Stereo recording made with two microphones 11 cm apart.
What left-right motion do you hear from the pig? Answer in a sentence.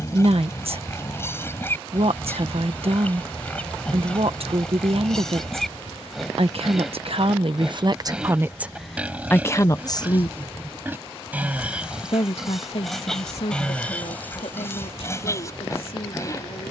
You can hear the pig move from left to right and back again.